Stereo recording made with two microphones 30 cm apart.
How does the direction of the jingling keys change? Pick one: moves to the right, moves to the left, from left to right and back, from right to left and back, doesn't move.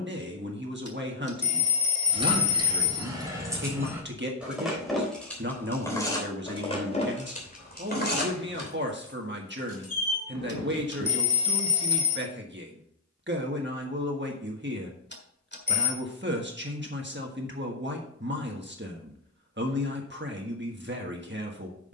moves to the left.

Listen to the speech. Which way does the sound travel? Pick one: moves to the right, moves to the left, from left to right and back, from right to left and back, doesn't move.
doesn't move.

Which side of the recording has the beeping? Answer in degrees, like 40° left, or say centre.
40° left.